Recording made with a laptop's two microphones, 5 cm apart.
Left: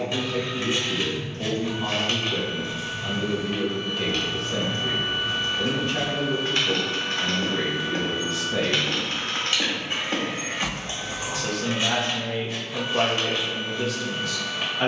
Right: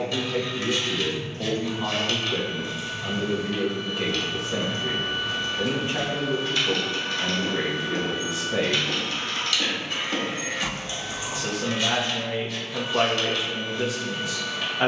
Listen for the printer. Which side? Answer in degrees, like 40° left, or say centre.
20° left.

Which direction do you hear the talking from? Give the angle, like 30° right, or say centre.
20° right.